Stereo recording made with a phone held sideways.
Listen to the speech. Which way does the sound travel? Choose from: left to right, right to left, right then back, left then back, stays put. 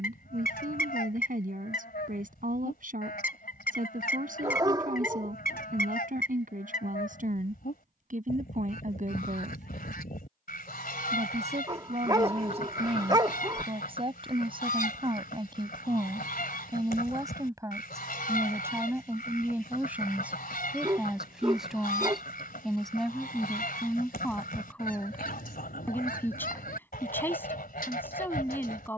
right to left.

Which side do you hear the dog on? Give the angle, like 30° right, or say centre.
30° right.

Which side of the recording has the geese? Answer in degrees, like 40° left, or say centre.
80° left.